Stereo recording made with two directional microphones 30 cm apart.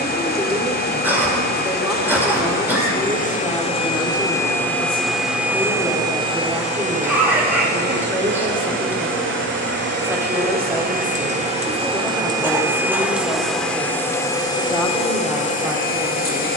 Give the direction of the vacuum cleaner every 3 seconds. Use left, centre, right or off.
left, centre, right, right, centre, left.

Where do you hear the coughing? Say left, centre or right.
centre.